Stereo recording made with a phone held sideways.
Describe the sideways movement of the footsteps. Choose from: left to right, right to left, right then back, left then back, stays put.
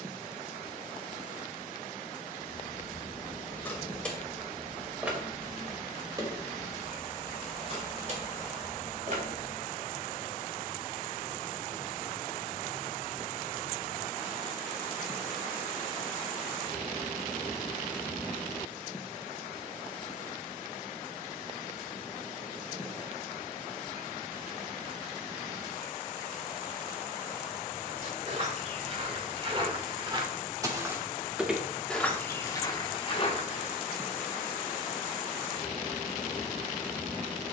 right to left.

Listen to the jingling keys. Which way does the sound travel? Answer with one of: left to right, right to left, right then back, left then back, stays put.
left to right.